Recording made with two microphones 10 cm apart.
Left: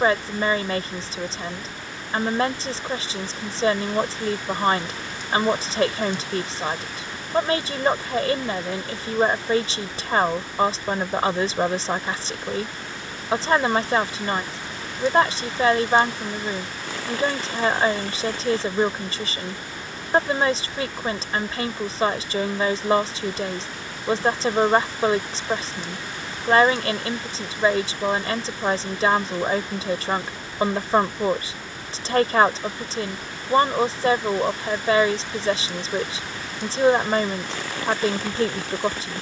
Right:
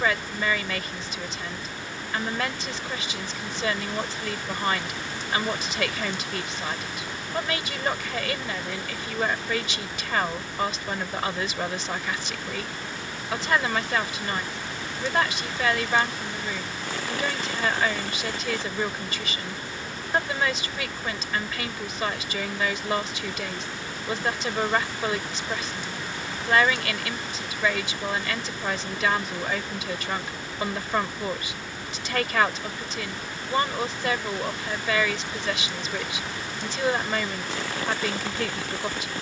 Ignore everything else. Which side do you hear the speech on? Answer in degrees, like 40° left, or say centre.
30° left.